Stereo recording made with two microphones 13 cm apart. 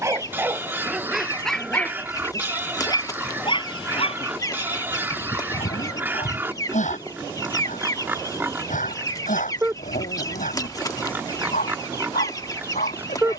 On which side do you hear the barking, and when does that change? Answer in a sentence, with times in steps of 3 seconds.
You can hear the barking in the centre from 0 s and on the left from 3 s.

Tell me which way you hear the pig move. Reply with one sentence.
You can hear the pig stay in one place.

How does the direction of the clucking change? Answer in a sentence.
In this clip you hear the clucking stay in one place.